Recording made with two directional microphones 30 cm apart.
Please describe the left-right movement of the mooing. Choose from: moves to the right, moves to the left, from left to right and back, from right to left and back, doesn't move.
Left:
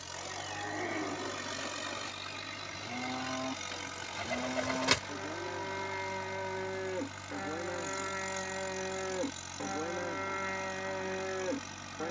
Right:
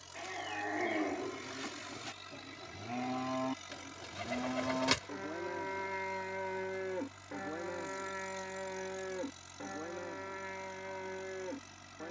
moves to the left.